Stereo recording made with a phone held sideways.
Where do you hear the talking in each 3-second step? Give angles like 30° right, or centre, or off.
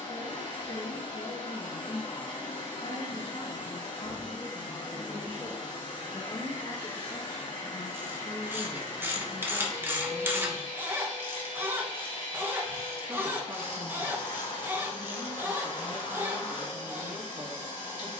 60° left, 50° left, 20° left, centre, 30° right, 30° right.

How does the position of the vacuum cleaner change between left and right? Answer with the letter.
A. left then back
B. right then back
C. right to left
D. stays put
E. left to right
D.